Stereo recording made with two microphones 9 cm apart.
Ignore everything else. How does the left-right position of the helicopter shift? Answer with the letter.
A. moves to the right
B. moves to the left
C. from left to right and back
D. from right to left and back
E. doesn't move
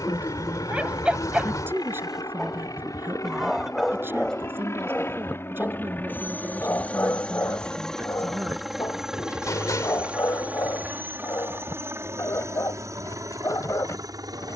A.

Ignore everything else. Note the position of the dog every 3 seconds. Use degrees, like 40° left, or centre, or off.
10° right, 10° left, 30° left, 40° left, 40° left.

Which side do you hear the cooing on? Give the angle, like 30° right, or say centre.
40° left.